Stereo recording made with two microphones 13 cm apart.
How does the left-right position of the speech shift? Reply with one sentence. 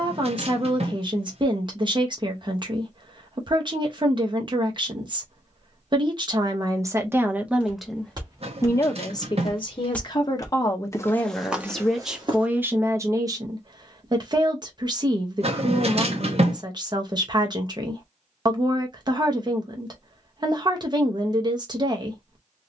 In this clip you hear the speech go left and come back.